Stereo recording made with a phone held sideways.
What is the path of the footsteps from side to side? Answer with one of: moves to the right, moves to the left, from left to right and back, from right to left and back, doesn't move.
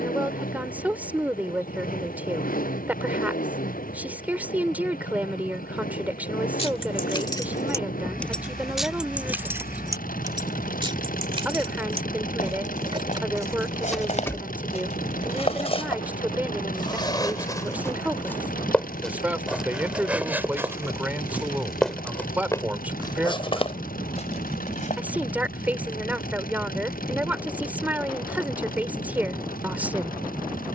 from left to right and back.